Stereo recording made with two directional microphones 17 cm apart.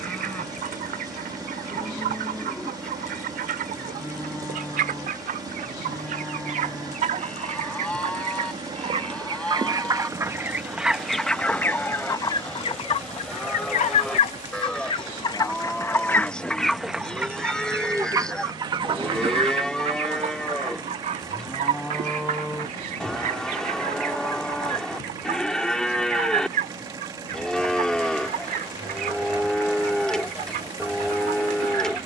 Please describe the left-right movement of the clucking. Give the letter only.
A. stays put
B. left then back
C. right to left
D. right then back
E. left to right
B.